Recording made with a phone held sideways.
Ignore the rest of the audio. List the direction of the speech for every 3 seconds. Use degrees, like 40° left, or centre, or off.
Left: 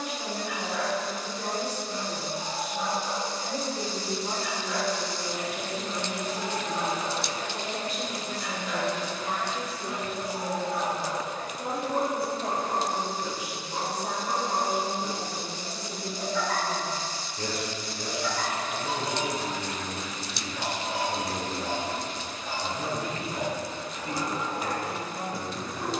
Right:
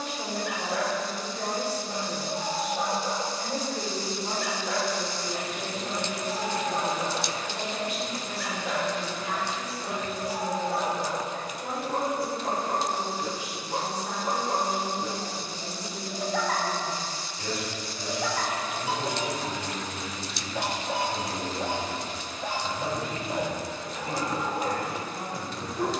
30° right, centre, 30° left, 50° left, 60° left, 60° left, 60° left, 60° left, 60° left.